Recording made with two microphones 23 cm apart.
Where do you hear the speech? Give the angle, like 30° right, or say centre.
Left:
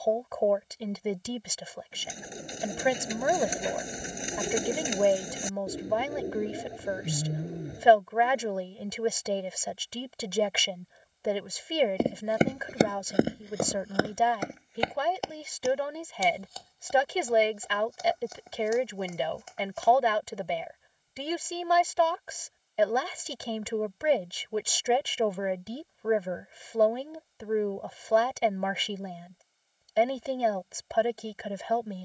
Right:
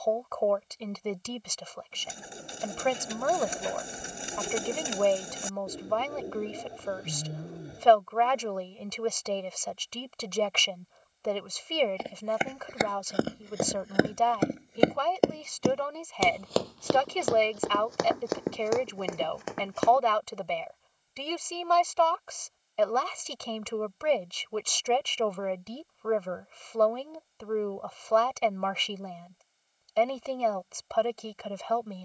10° left.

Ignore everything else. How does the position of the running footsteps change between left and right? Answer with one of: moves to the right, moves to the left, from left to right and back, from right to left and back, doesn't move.
moves to the right.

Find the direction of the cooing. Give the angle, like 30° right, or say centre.
20° left.